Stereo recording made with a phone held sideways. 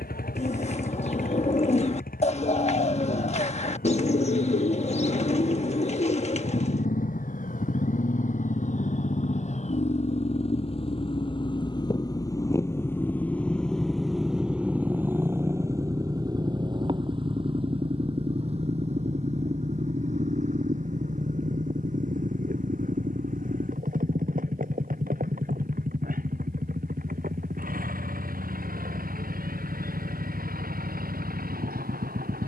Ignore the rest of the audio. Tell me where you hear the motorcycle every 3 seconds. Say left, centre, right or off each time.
left, left, left, left, centre, right, right, right, right, right, right.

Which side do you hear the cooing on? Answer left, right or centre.
left.